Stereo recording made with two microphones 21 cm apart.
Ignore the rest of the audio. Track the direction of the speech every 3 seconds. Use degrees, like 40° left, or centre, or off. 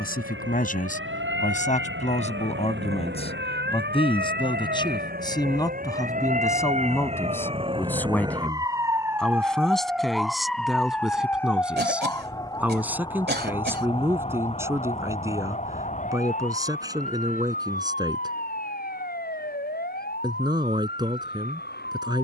40° left, 20° left, 10° left, centre, 10° right, 20° right, 20° right, 20° right.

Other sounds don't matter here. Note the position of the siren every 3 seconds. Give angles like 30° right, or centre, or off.
70° right, 50° right, 30° right, centre, 20° left, 40° left, 50° left, 50° left.